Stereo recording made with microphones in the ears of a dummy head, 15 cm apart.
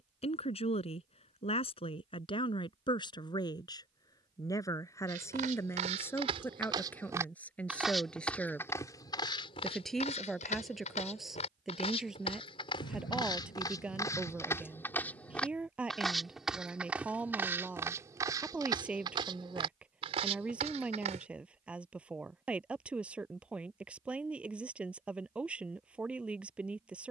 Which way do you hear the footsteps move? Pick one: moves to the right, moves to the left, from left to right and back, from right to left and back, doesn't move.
from right to left and back.